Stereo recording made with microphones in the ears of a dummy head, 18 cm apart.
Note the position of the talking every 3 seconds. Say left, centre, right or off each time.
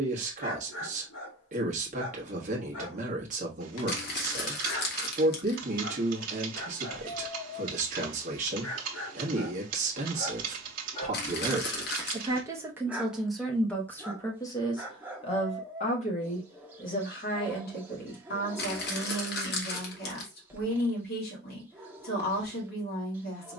right, right, right, right, centre, left, left, left.